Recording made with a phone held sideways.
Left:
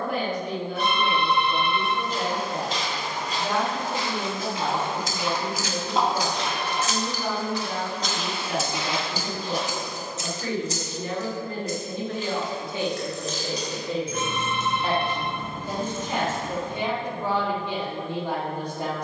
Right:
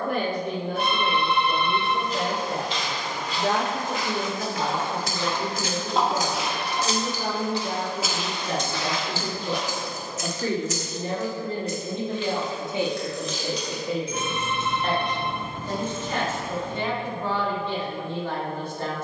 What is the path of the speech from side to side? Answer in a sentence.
You can hear the speech go from the right side to the left.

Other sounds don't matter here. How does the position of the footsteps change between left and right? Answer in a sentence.
You can hear the footsteps move from left to right and back again.